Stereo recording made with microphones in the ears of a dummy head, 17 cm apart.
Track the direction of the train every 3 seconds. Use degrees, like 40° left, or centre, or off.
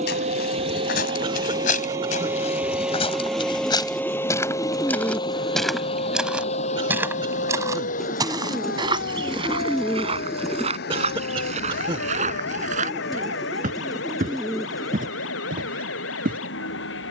20° right, 20° left, 40° left, 50° left, 60° left, 70° left.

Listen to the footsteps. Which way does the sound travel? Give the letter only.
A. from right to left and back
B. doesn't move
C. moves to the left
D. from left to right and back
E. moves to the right
E.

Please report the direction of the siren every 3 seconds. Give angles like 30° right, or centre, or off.
30° right, 10° left, 50° left, 70° left, 80° left, 80° left.